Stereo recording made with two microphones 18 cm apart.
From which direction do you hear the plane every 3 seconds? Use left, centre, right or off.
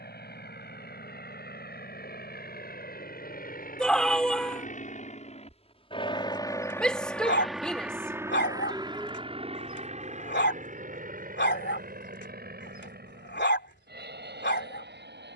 left, left, centre, right, right.